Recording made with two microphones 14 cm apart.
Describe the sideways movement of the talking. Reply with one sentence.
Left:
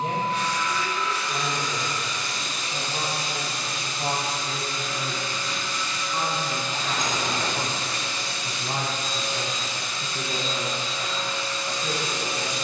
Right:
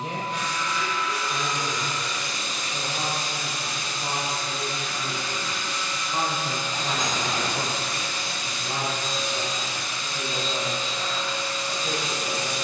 You can hear the talking go right and come back.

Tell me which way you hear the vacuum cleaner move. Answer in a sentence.
In this clip you hear the vacuum cleaner stay put.